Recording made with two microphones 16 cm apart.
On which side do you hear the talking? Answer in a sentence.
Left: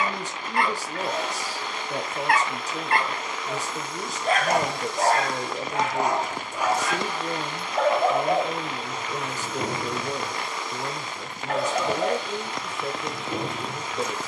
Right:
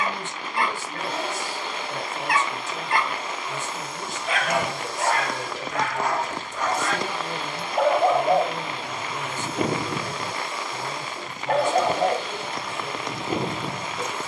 In this clip you hear the talking on the left.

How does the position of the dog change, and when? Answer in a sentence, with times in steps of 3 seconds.
In this clip you hear the dog on the left from 0 s, in the centre from 6 s and on the right from 9 s.